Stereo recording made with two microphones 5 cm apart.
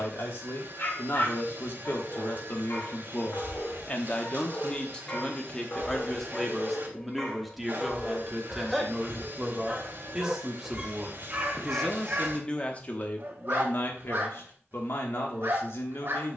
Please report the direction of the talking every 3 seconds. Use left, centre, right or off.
left, left, centre, centre, left, left.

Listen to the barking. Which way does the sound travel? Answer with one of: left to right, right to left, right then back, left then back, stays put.
left to right.